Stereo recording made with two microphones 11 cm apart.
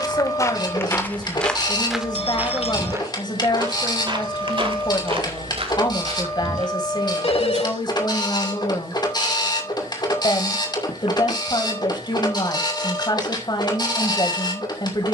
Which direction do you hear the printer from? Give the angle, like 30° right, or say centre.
40° left.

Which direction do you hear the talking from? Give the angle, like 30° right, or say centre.
40° left.